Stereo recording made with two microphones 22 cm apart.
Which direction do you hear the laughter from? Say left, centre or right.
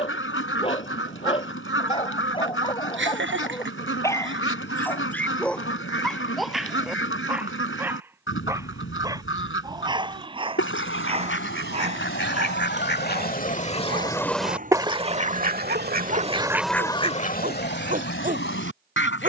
right.